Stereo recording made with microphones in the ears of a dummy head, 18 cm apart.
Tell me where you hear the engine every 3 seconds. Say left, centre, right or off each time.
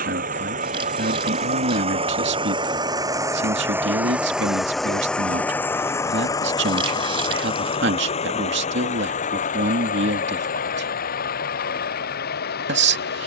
right, centre, left, left, left.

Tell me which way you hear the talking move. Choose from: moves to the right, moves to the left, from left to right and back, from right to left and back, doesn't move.
doesn't move.